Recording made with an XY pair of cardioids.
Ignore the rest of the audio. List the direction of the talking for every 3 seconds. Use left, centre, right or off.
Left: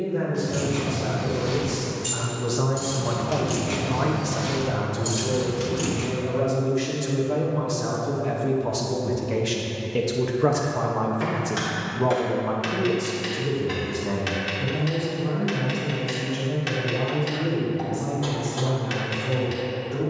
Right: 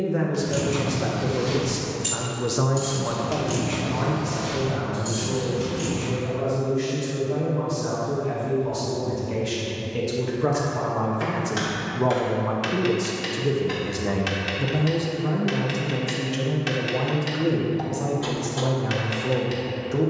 right, left, left, left, right, right, right.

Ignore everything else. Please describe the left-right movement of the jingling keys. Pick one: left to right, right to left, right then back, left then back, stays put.
right to left.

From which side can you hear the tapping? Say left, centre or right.
centre.